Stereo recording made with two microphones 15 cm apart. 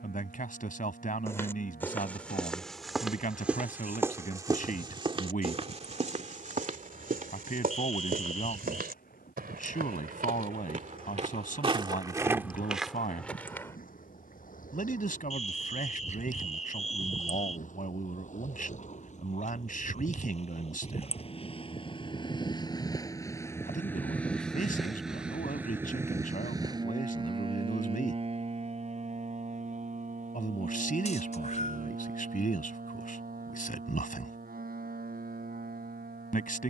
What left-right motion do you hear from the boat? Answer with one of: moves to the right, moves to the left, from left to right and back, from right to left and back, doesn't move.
moves to the right.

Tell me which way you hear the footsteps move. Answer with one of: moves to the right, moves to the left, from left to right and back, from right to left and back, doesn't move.
from left to right and back.